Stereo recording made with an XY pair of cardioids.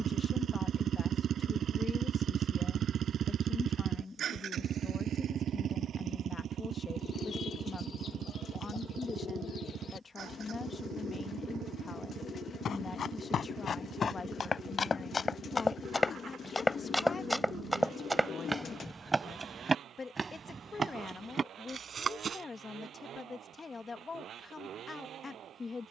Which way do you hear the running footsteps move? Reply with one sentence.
In this clip you hear the running footsteps go from the left side to the right.